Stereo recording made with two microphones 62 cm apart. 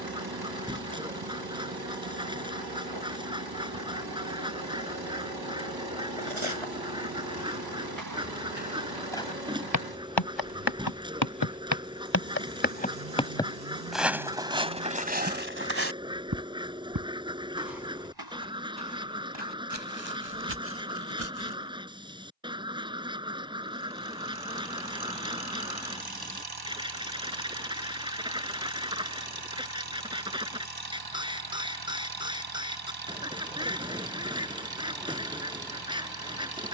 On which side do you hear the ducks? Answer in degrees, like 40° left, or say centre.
10° right.